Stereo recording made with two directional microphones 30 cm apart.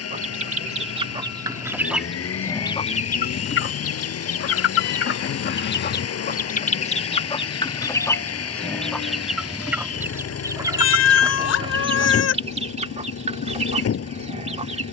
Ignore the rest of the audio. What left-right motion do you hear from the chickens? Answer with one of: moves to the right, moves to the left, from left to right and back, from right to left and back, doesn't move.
from right to left and back.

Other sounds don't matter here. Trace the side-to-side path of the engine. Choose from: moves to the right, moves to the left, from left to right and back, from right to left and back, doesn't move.
doesn't move.